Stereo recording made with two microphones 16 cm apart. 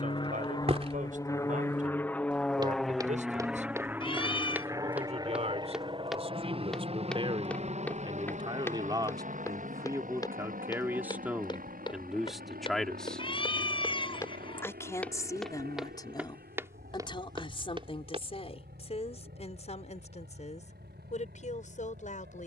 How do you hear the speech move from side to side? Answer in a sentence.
In this clip you hear the speech travel towards the left.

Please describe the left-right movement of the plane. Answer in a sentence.
You can hear the plane move from left to right.